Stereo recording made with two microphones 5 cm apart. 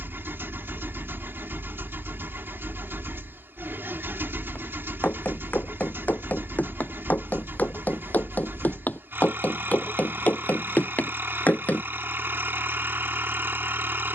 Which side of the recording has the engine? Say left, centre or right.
right.